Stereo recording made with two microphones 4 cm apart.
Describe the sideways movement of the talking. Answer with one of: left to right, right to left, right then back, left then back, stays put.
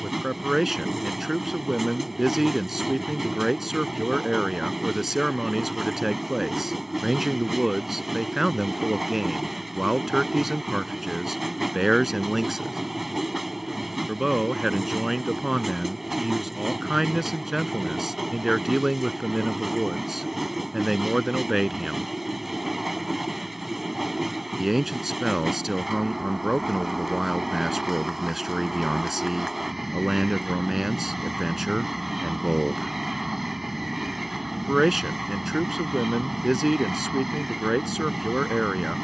stays put.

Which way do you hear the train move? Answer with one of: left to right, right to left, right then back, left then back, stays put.
stays put.